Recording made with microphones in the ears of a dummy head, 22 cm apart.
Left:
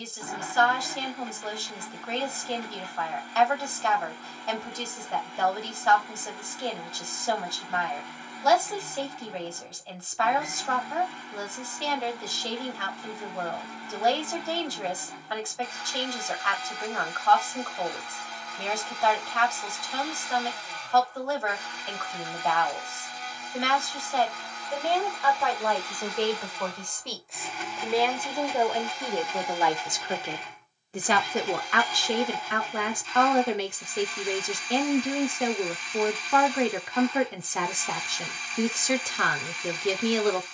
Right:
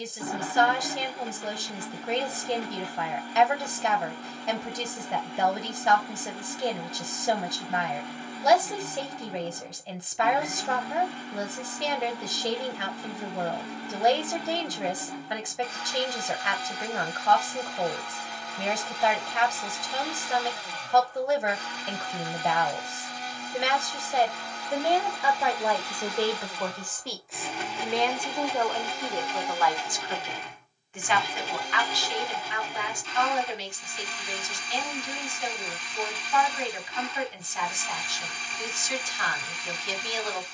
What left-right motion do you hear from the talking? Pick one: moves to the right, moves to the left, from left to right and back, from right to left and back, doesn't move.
moves to the left.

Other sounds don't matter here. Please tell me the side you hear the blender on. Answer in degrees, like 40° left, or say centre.
50° right.